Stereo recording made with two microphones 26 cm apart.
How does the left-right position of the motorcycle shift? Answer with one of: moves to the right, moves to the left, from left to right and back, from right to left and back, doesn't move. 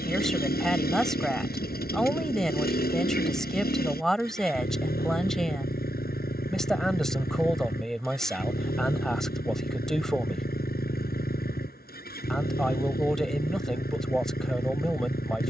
doesn't move.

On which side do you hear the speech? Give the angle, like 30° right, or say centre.
centre.